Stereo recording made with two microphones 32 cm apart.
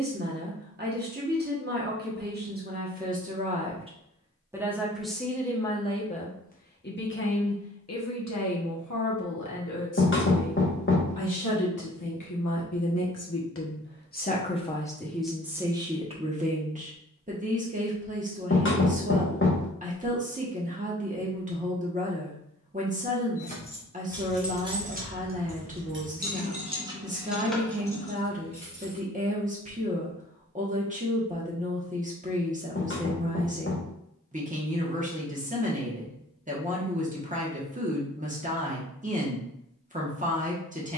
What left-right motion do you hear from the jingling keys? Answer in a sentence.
You can hear the jingling keys go right and come back.